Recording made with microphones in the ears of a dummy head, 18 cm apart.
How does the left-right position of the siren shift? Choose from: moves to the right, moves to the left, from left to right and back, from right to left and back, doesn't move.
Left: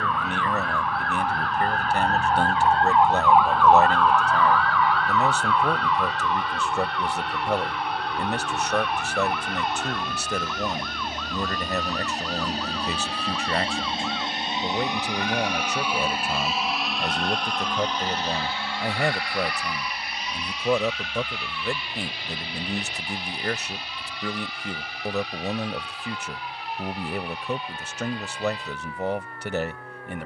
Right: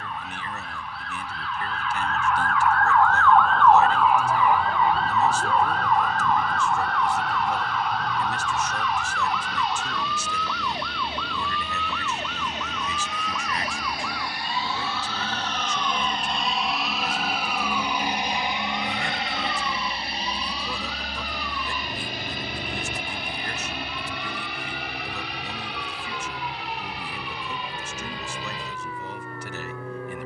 moves to the right.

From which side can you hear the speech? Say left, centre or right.
left.